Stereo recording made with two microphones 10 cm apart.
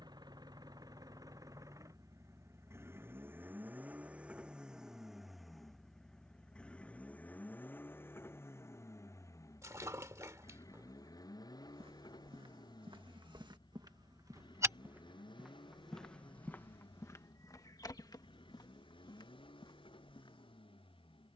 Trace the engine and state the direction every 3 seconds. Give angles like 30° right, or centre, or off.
40° right, 10° right, 20° left, 40° left, 50° left, 60° left, 60° left.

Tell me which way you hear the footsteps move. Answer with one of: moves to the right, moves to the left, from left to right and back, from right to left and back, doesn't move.
moves to the left.